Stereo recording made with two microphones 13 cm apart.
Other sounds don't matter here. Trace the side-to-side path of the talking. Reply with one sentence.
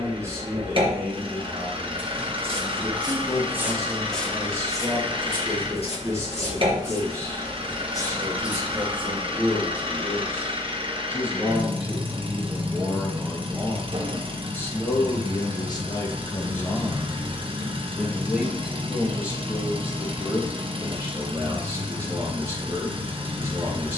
In this clip you hear the talking go left and come back.